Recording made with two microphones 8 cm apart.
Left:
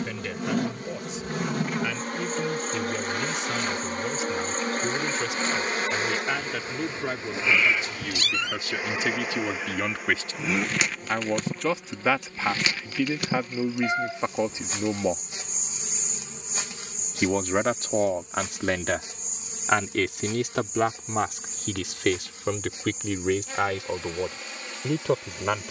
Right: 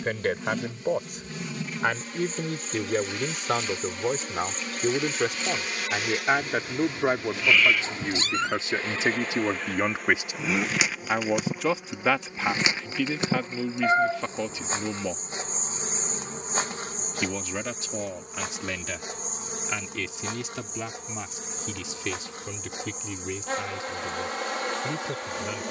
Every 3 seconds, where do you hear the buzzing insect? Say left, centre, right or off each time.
left, left, left, centre, right, right, right, right, right.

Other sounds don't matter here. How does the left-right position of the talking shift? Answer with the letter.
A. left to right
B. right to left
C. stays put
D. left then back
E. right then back
B.